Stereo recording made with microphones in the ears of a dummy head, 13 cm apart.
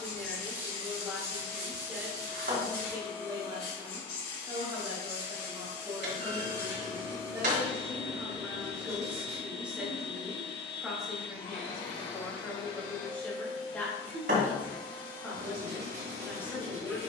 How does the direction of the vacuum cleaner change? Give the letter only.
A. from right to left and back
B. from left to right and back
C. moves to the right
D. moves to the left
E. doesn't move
E.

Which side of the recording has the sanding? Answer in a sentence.
You can hear the sanding on the right.